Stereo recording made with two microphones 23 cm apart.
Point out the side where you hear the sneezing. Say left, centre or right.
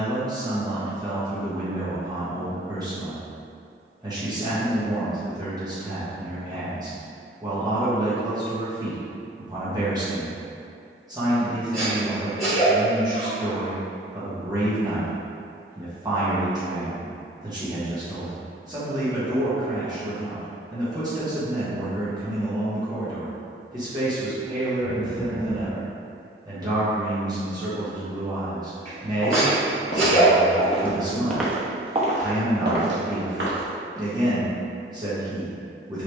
left.